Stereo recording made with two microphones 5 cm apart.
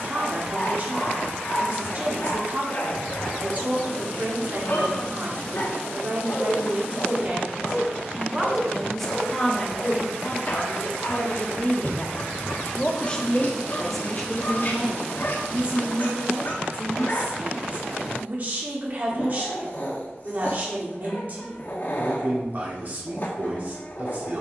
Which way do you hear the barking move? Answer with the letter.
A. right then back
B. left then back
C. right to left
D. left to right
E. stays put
E.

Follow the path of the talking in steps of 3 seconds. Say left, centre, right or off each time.
right, right, right, left, centre, right, right, right.